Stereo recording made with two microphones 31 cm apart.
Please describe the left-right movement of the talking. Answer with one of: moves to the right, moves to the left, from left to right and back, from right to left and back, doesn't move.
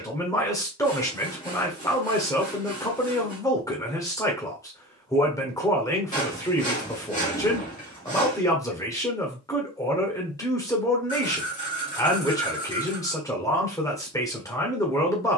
doesn't move.